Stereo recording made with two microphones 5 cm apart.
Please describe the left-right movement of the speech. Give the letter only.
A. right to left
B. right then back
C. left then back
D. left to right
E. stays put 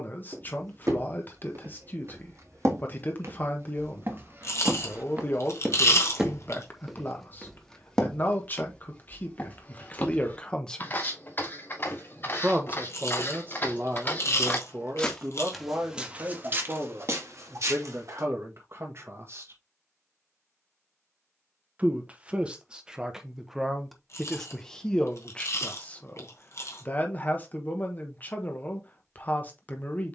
B.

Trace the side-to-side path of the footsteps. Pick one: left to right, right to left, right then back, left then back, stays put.
left then back.